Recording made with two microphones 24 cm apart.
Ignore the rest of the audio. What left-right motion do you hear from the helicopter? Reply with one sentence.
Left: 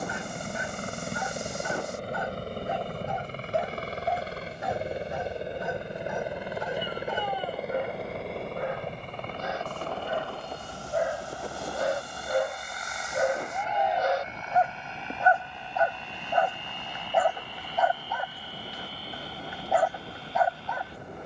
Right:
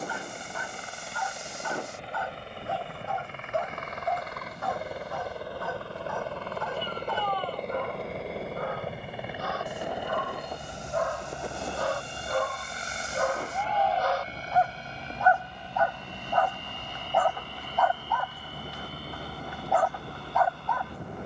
In this clip you hear the helicopter go from the left side to the right.